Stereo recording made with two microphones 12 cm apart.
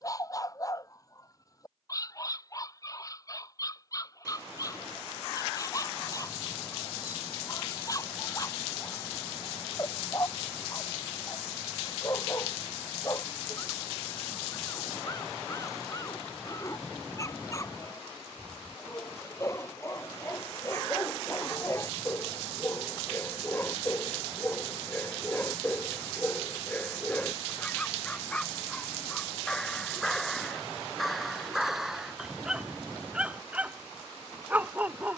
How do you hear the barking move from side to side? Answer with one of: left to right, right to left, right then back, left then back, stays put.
left to right.